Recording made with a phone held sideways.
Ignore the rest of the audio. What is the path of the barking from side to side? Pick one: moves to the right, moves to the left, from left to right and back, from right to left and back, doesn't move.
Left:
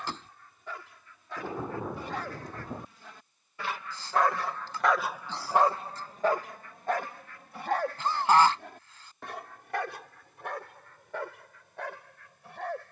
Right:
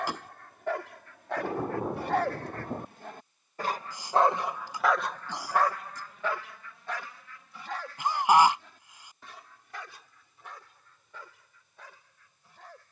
moves to the left.